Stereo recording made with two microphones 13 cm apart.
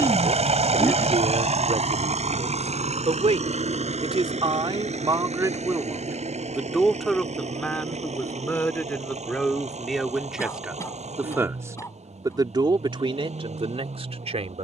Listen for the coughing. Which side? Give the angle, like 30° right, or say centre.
20° left.